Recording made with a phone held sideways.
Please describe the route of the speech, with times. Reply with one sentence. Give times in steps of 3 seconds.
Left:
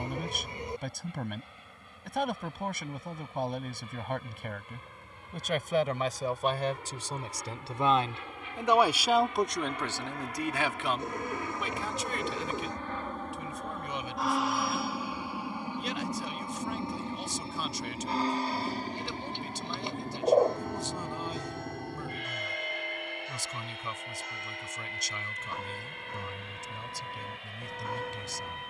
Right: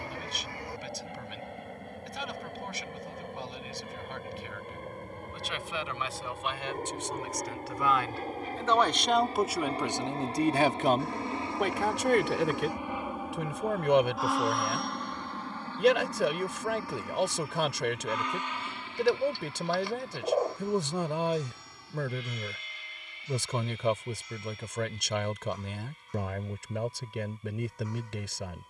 You can hear the speech on the left from 0 s and on the right from 9 s.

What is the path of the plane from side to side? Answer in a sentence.
In this clip you hear the plane move from right to left.